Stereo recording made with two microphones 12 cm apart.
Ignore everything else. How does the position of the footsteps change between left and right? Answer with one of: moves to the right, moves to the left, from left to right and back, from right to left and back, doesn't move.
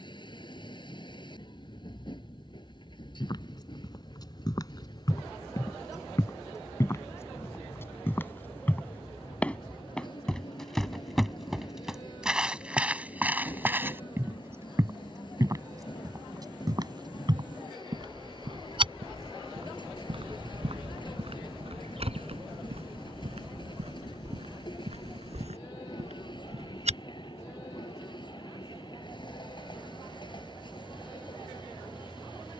moves to the right.